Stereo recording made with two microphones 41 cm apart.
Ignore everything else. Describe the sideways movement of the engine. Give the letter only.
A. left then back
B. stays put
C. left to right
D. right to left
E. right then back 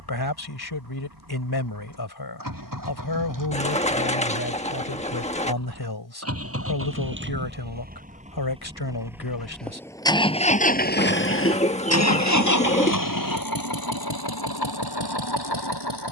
D.